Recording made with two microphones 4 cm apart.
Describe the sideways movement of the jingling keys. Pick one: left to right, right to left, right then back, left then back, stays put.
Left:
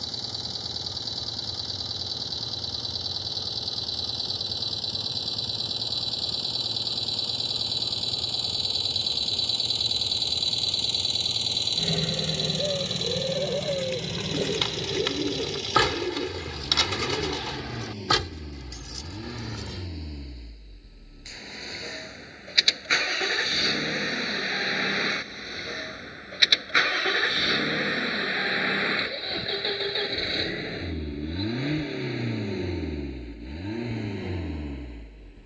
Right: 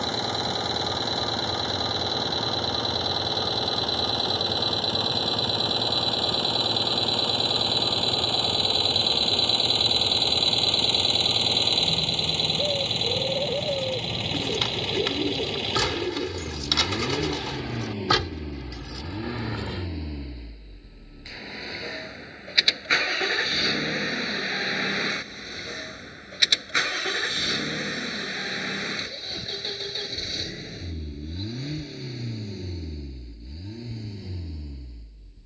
left to right.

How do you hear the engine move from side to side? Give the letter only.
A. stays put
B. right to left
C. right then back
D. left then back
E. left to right
B.